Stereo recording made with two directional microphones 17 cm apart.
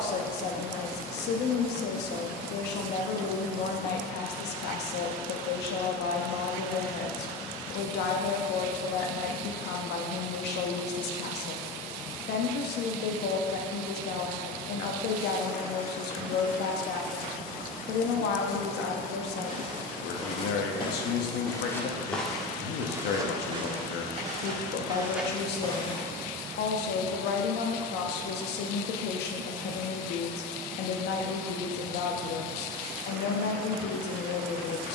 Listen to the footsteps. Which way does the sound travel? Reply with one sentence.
You can hear the footsteps move from left to right and back again.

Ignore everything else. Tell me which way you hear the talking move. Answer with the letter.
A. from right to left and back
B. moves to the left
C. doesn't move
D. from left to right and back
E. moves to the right
C.